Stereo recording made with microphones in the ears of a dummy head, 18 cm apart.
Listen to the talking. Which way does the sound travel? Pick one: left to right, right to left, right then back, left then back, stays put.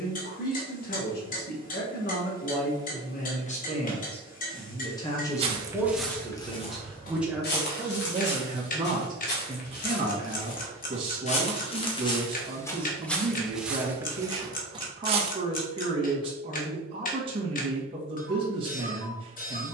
left to right.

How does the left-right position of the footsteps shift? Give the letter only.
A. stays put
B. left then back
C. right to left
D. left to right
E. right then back
B.